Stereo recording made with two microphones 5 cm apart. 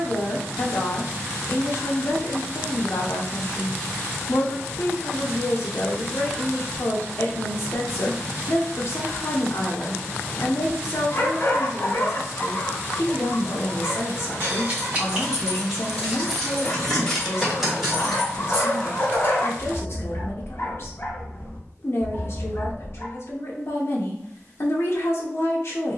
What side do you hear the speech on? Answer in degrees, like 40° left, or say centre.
50° left.